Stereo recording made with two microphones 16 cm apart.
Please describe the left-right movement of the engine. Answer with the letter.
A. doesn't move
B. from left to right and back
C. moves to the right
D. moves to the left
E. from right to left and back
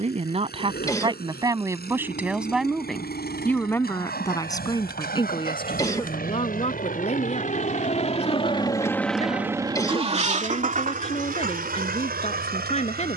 C.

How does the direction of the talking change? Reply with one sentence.
You can hear the talking go from the right side to the left.